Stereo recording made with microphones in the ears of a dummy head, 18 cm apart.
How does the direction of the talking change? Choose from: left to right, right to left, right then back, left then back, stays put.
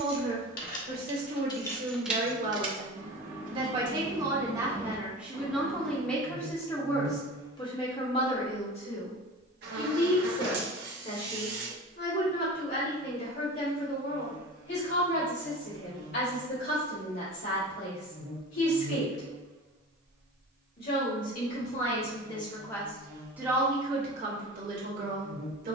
left then back.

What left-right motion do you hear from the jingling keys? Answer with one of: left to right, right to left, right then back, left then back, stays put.
right then back.